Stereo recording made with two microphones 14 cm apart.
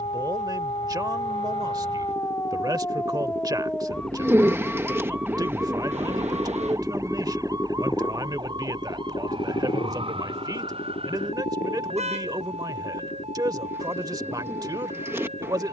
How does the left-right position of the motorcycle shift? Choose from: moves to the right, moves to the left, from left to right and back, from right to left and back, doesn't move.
moves to the left.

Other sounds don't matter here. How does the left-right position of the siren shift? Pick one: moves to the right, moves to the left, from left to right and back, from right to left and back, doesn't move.
moves to the right.